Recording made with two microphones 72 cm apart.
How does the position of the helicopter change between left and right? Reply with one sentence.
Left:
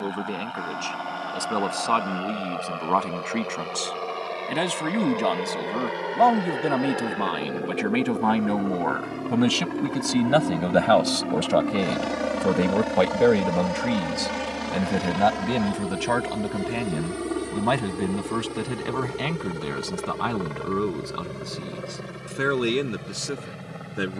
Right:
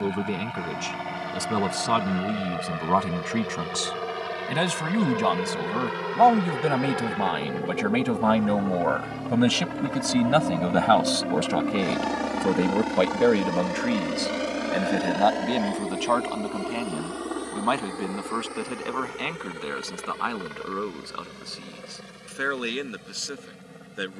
You can hear the helicopter move to the left.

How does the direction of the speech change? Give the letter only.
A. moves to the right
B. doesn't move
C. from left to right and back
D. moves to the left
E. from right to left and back
D.